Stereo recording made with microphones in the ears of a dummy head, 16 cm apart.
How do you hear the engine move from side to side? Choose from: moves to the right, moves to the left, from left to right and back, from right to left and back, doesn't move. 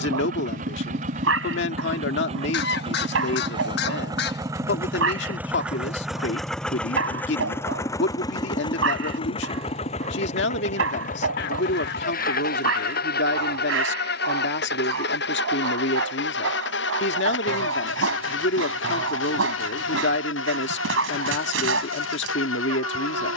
moves to the left.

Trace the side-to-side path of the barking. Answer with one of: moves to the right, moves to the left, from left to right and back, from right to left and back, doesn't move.
doesn't move.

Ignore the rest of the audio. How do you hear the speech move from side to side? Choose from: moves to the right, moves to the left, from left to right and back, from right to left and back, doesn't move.
doesn't move.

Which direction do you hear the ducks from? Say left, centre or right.
left.